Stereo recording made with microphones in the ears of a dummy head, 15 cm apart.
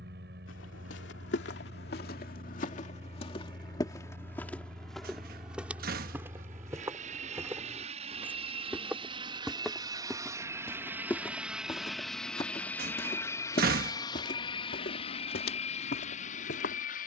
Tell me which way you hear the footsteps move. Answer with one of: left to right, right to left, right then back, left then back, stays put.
right then back.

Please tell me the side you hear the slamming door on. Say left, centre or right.
right.